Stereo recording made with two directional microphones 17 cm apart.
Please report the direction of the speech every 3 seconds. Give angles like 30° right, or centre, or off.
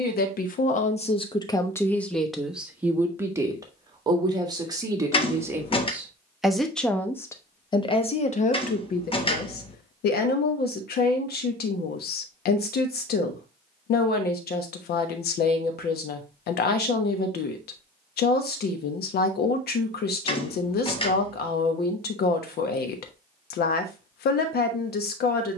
30° left, 20° right, 30° left, 70° left, 70° left, 70° left, 70° left, 70° left, 70° left.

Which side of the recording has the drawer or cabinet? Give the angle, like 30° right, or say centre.
30° left.